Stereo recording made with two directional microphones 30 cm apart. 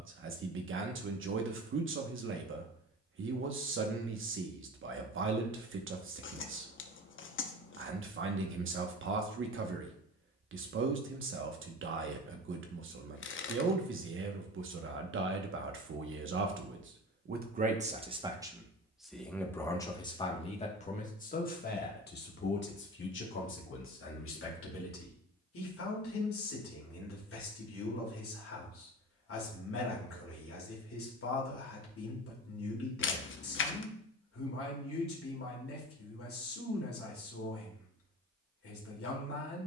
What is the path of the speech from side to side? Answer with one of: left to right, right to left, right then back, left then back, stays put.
right to left.